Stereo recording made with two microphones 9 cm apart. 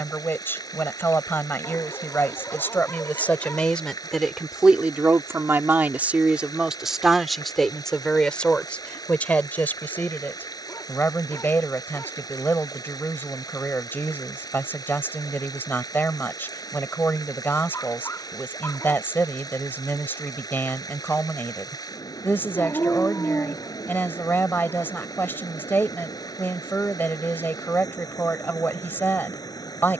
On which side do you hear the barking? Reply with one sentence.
In this clip you hear the barking on the left.